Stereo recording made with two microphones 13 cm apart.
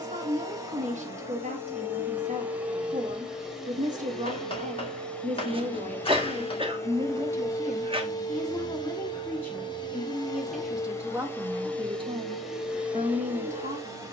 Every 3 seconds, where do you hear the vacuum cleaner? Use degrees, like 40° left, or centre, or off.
20° right, centre, 30° left, 30° left, 10° right.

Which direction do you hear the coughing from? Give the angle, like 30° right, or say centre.
40° right.